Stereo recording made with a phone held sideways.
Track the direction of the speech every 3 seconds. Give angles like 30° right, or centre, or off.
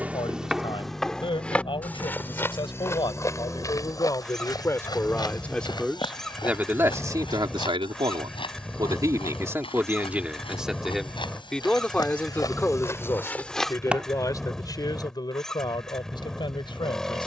40° left, 20° left, 20° right, 10° right, 20° left, 30° left.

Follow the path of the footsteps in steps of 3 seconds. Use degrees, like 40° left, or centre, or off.
10° left, 30° left, 30° left, 40° left, 10° left, off.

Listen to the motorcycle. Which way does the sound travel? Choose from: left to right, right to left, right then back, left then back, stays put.
stays put.